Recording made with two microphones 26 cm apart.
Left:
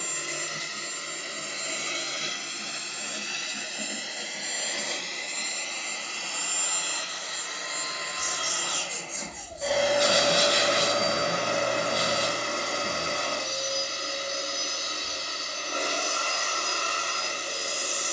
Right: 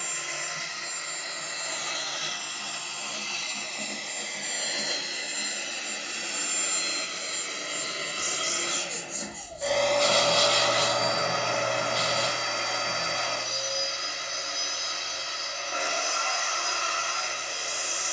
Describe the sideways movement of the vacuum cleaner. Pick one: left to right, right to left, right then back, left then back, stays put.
right then back.